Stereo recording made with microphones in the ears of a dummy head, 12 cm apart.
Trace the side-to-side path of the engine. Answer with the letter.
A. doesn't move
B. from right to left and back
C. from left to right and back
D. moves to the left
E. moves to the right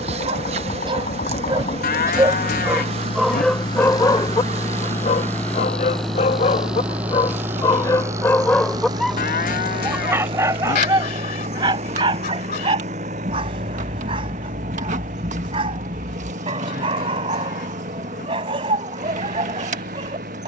E.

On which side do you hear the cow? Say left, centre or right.
left.